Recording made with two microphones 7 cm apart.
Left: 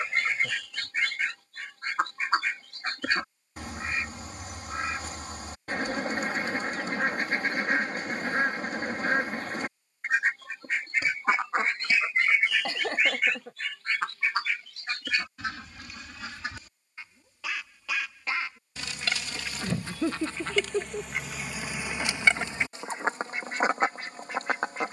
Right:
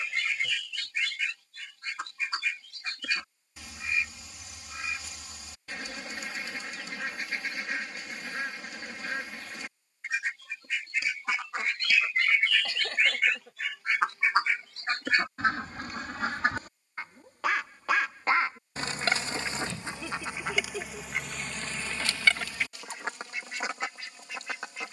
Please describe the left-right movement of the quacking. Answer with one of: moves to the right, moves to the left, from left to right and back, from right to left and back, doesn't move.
from left to right and back.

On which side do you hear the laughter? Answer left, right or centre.
left.